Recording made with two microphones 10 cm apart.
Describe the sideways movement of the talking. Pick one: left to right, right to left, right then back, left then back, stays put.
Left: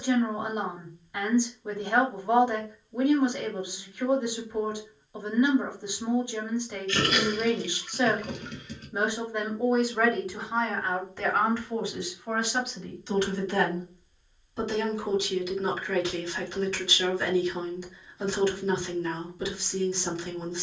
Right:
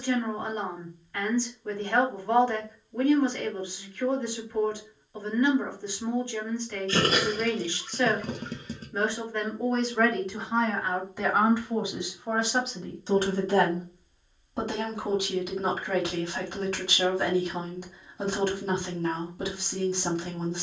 left to right.